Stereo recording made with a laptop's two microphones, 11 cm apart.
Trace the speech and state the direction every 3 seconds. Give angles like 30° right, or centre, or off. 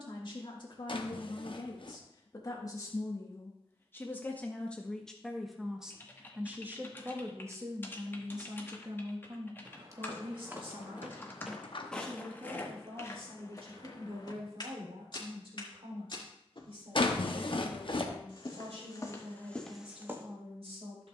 50° left, 10° left, 30° right, 50° right, 70° right, 70° right, 80° right.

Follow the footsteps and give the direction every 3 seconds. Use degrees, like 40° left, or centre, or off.
off, off, off, 10° right, 30° left, 50° left, 20° left.